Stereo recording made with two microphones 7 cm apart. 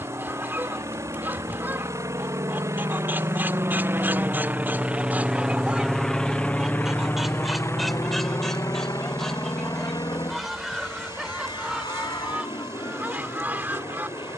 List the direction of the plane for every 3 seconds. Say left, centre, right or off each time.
right, right, left, left, left.